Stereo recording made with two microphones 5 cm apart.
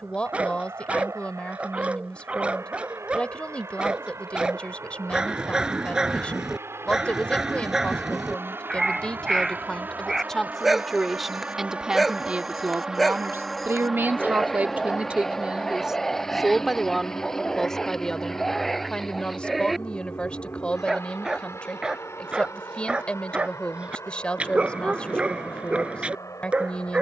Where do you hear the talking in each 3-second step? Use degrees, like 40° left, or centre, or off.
20° left, 20° left, 20° left, 10° left, 30° right, centre, 20° left, 20° left, 20° left.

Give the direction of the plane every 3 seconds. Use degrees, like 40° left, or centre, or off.
70° right, 60° right, 50° right, 30° right, centre, 20° left, 40° left, 50° left, 60° left.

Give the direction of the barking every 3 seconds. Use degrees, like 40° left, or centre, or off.
20° right, 20° right, 10° right, centre, centre, 10° left, centre, 20° right, 20° right.